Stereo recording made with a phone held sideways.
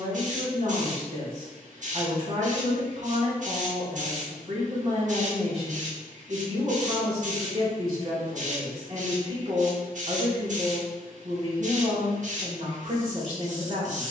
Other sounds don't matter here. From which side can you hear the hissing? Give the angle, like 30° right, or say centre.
60° right.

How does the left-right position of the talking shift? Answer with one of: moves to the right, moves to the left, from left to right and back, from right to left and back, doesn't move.
doesn't move.